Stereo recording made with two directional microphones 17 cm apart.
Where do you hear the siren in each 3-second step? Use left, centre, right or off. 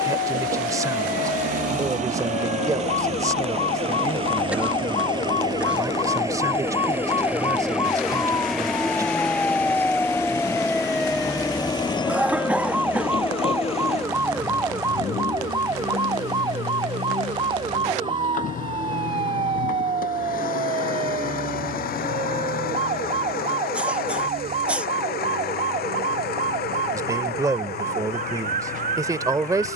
left, left, left, centre, centre, right, right, right, right, right.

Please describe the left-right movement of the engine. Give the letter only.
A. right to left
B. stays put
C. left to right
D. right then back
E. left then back
A.